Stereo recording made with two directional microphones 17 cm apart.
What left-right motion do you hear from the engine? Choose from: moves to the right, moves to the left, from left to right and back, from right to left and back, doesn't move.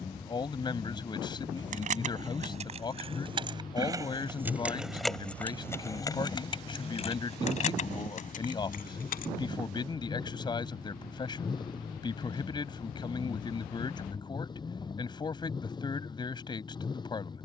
doesn't move.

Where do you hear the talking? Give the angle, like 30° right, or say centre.
30° left.